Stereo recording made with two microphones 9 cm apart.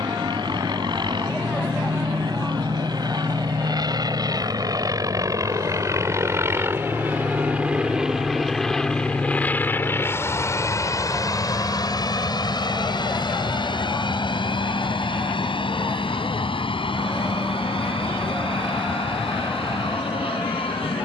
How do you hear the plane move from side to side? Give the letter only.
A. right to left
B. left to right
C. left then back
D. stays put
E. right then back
A.